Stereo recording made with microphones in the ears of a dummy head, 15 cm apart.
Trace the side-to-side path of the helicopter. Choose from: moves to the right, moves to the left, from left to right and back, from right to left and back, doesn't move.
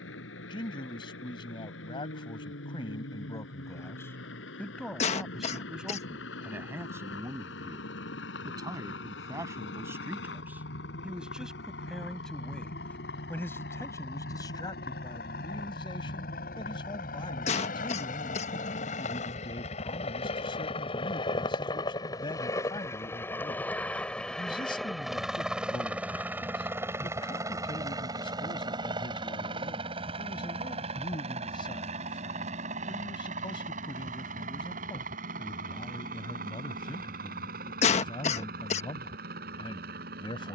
moves to the right.